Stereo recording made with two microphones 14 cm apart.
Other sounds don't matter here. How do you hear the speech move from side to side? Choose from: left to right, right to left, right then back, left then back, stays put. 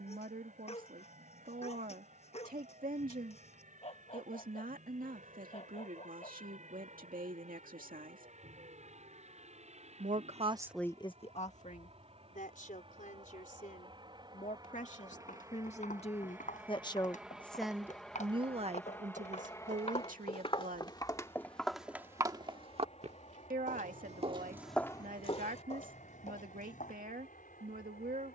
left then back.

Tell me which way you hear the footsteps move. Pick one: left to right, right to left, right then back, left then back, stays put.
right then back.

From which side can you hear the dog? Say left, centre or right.
left.